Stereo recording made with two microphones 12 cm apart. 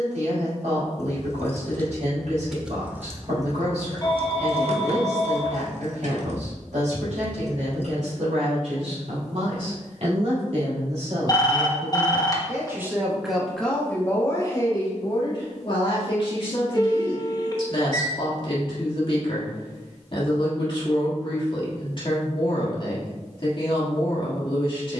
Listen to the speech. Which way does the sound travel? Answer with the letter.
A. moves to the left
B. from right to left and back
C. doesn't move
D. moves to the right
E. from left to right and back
A.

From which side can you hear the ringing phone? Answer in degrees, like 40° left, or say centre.
30° left.